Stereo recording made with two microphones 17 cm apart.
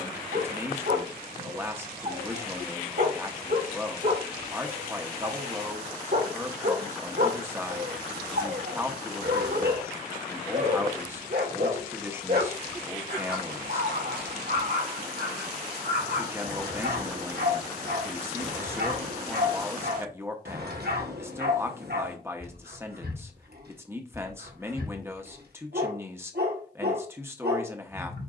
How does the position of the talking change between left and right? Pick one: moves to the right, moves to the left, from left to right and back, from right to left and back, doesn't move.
doesn't move.